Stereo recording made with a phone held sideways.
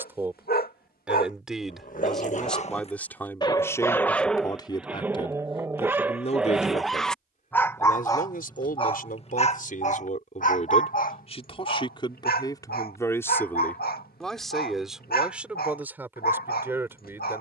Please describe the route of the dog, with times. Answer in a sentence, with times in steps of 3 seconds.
You can hear the dog on the left from 0 s, in the centre from 3 s and on the left from 9 s.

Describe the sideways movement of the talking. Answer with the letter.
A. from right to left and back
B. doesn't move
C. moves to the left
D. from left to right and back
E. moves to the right
A.